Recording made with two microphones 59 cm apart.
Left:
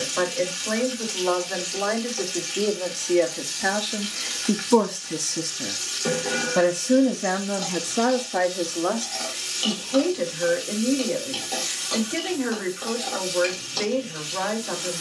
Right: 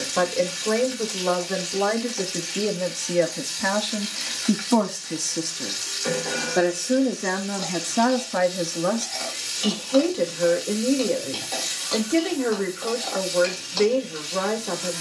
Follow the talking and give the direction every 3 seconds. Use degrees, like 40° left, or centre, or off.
60° right, 20° right, 10° right, 60° right, 60° right.